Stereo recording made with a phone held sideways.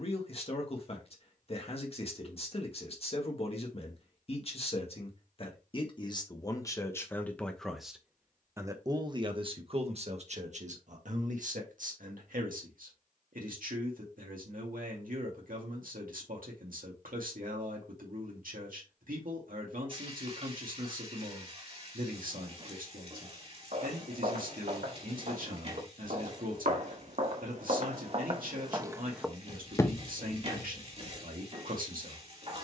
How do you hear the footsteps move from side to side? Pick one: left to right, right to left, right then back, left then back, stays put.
right to left.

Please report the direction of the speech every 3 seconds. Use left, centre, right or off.
left, left, centre, right, right, right, right, right, right, right, right.